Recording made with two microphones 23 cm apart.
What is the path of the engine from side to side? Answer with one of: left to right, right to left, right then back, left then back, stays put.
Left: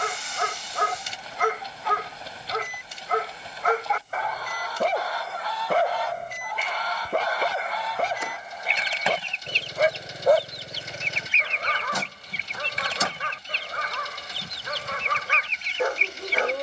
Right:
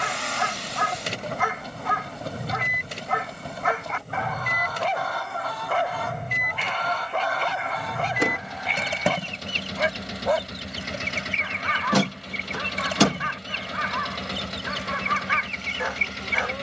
stays put.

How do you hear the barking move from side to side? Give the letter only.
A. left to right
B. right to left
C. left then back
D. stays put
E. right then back
D.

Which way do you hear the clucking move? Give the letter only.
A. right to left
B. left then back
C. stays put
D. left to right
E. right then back
C.